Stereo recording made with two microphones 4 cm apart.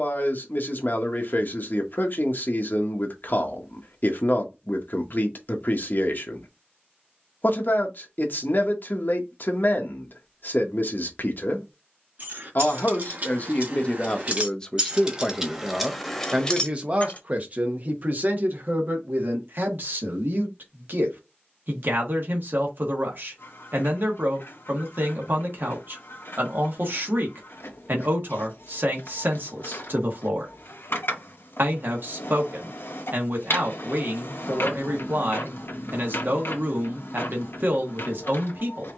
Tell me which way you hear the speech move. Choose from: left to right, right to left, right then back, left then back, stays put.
left to right.